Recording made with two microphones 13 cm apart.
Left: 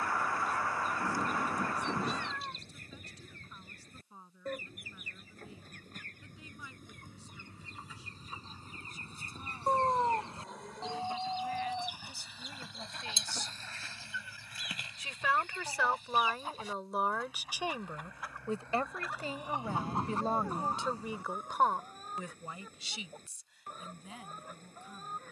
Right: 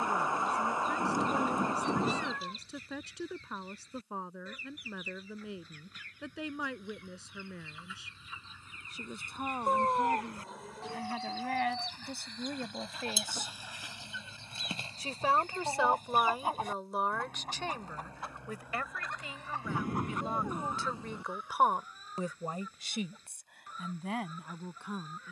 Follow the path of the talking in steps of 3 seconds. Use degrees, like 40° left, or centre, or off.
80° right, 80° right, 80° right, 70° right, 60° right, 10° right, 30° left, 40° right, 70° right.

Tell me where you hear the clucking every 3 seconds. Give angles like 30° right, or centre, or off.
50° left, 50° left, 40° left, 30° left, 10° right, 50° right, 10° left, 50° left, 50° left.